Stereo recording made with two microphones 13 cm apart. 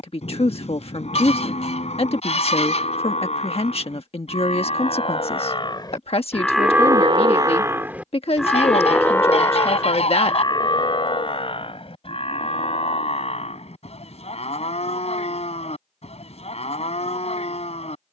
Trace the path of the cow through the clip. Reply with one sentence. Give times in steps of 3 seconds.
In this clip you hear the cow on the left from 0 s, in the centre from 6 s and on the left from 9 s.